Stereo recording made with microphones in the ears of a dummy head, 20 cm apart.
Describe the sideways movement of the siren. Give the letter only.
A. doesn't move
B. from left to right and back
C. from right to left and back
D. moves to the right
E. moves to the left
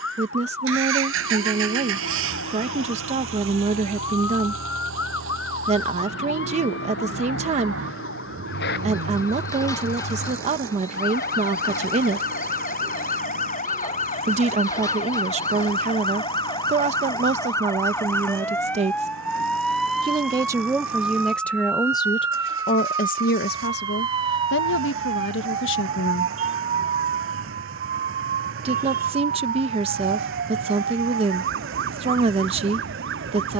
D.